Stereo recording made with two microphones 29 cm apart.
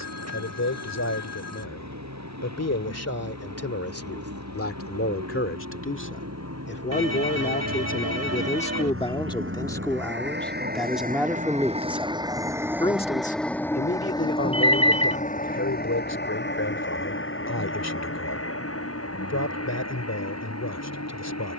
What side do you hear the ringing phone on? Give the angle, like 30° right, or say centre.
60° right.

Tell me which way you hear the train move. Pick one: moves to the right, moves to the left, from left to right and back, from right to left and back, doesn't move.
moves to the left.